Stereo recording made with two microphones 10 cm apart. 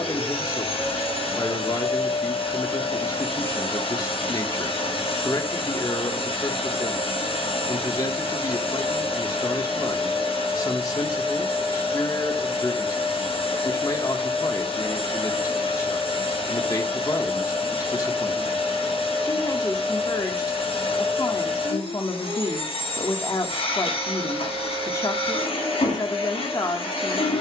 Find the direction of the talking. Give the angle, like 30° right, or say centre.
40° left.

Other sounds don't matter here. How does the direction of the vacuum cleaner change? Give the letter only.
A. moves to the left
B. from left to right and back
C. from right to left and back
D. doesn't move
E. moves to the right
D.